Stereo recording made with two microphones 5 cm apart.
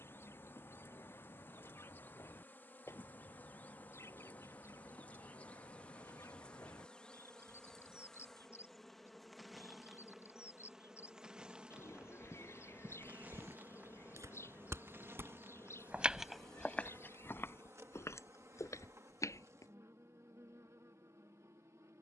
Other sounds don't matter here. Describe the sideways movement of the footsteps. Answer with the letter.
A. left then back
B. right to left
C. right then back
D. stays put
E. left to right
B.